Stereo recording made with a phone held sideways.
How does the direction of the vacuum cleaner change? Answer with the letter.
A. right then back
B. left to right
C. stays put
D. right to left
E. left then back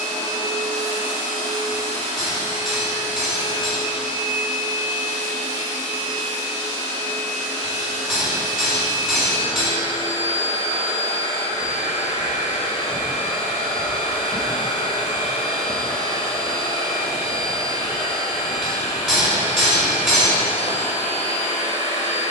C.